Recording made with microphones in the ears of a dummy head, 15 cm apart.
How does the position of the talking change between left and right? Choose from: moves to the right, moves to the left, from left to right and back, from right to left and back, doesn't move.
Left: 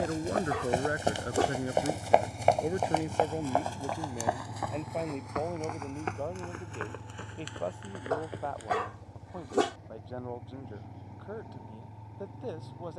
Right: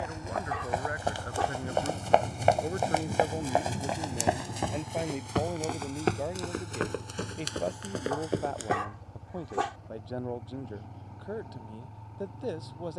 moves to the right.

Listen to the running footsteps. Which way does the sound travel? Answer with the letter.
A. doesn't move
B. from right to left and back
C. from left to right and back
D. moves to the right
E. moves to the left
D.